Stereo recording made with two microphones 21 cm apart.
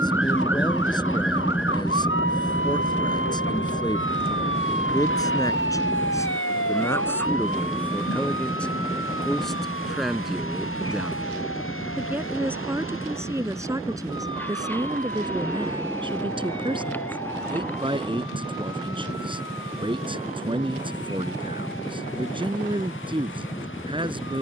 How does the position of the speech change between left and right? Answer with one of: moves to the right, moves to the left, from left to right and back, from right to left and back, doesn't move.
moves to the right.